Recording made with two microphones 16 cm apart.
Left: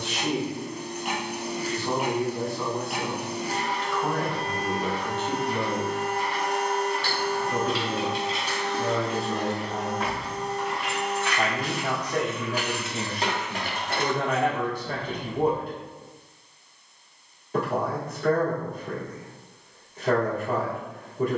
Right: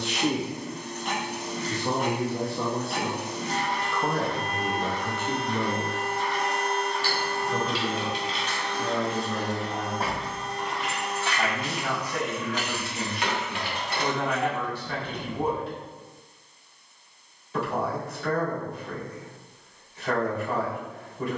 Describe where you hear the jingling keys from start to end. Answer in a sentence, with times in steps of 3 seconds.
In this clip you hear the jingling keys not at all from 0 s, on the left from 6 s, on the right from 9 s, on the left from 12 s and not at all from 18 s.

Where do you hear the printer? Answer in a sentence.
You can hear the printer in the centre.